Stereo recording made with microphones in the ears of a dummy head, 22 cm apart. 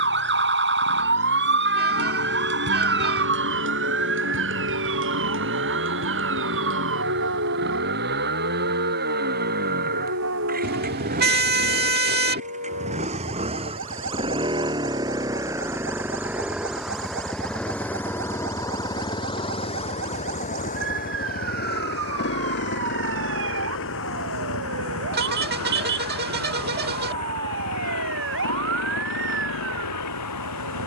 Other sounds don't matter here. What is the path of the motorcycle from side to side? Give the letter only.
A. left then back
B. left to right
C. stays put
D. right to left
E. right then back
D.